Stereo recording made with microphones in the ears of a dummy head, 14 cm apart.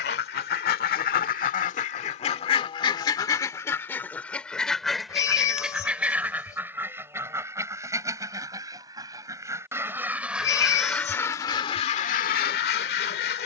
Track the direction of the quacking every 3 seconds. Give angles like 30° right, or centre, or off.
50° left, 10° left, 20° right, centre, 60° left.